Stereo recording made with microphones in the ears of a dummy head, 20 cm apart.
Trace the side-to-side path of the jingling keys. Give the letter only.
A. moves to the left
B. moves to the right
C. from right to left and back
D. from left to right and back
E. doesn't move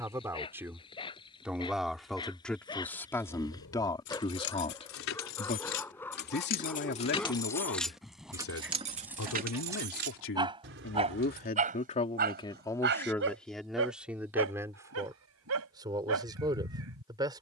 B.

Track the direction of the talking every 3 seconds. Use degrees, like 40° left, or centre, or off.
centre, 20° left, 60° left, 60° left, centre, 20° right.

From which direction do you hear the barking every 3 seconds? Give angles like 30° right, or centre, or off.
20° left, 10° left, centre, 20° right, 60° right, 70° right.